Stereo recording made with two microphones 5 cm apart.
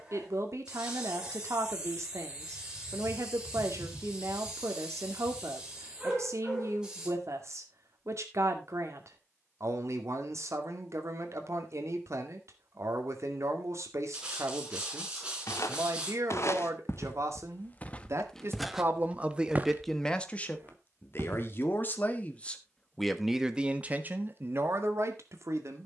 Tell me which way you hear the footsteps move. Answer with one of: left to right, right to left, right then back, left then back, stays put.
left to right.